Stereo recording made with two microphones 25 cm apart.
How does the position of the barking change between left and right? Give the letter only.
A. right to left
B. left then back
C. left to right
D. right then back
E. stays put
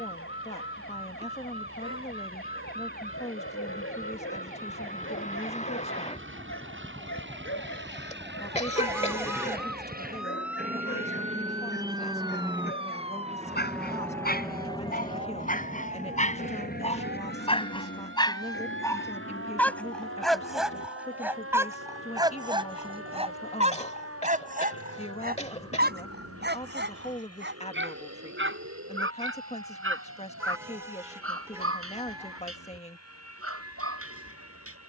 C.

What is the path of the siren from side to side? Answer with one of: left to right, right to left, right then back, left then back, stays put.
left to right.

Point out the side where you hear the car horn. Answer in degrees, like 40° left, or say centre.
10° right.